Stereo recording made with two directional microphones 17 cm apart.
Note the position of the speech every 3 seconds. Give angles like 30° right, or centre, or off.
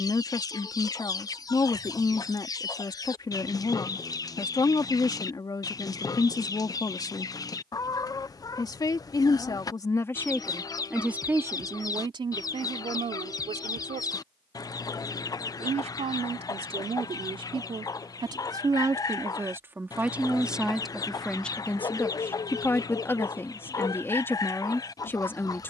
20° left, 20° left, 20° left, centre, 40° right, 30° right, 10° right, 10° left, 10° left.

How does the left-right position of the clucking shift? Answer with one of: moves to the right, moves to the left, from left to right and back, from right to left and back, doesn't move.
doesn't move.